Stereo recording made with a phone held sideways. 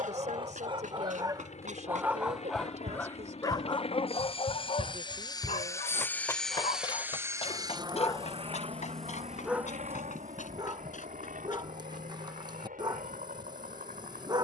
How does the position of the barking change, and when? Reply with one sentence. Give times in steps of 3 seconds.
You can hear the barking on the right from 0 s, on the left from 3 s and on the right from 9 s.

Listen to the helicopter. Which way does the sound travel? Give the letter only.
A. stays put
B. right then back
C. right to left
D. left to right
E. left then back
D.